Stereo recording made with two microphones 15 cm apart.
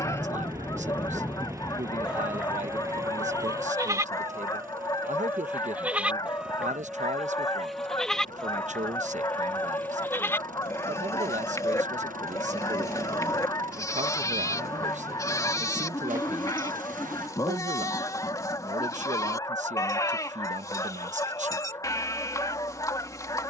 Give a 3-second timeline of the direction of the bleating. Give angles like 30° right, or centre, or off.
centre, 20° right, centre, 20° left, 20° left, 20° left, 20° left, 20° left.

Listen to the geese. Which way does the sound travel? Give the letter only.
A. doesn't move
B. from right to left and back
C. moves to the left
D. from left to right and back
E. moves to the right
A.